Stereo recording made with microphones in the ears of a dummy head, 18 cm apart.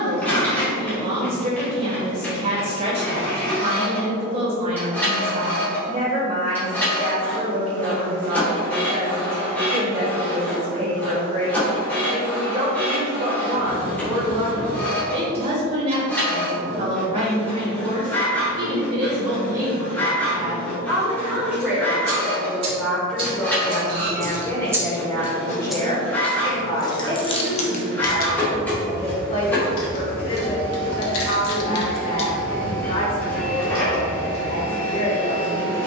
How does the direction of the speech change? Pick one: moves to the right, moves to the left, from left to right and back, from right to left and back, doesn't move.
moves to the left.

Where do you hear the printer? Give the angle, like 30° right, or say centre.
10° left.